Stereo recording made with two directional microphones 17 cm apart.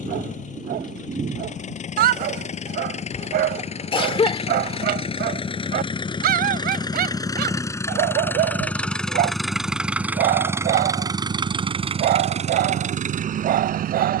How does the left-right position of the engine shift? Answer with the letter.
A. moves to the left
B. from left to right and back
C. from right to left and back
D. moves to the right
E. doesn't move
D.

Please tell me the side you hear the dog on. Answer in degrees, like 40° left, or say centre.
60° right.